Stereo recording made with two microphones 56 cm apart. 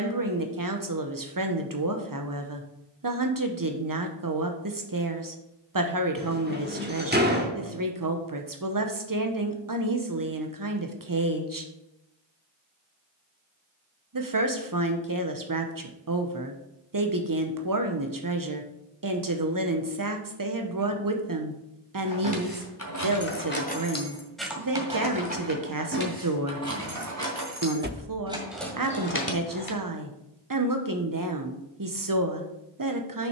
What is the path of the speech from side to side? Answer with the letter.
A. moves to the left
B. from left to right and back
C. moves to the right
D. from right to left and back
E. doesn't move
E.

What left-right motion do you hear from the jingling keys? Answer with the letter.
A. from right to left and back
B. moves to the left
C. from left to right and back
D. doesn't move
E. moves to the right
C.